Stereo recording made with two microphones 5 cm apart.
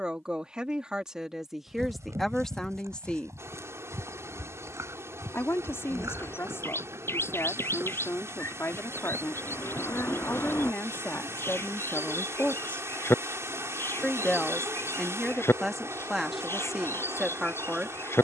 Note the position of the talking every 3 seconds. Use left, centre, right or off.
centre, left, left, left, left, centre.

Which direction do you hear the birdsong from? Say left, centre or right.
left.